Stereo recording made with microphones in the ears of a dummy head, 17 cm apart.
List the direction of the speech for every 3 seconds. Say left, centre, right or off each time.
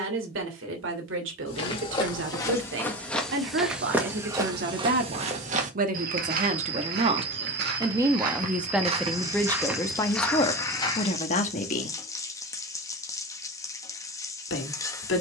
right, right, right, left, left.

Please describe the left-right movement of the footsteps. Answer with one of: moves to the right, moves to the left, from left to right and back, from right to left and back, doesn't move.
from left to right and back.